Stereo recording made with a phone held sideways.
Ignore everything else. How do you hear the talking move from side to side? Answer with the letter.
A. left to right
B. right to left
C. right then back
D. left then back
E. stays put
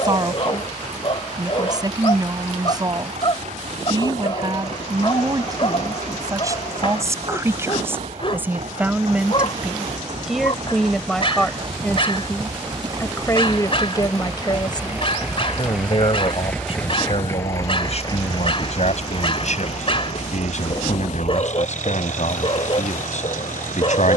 B.